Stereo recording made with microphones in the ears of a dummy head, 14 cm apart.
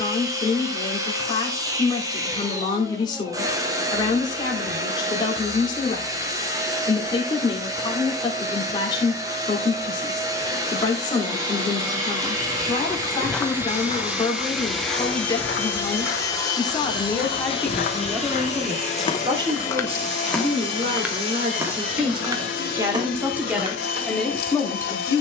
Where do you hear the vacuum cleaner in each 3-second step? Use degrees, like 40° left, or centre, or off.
20° right, 20° right, 20° right, 20° right, 10° right, 20° left, 50° left, 60° left, 60° left.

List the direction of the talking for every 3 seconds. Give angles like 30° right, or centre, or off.
30° left, 30° left, 30° left, 30° left, 30° left, 20° left, 30° right, 30° right, 10° left.